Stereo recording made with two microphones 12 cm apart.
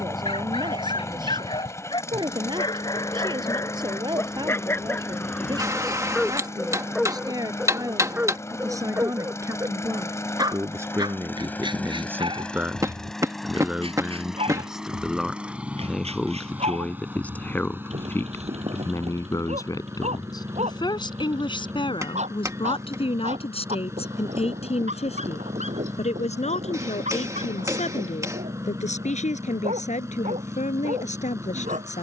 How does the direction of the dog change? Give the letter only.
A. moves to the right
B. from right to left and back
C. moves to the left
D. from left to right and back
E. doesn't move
A.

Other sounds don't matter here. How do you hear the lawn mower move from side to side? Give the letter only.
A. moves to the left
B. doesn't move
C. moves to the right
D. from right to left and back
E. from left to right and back
C.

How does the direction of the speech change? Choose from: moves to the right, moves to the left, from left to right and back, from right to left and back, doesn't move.
moves to the left.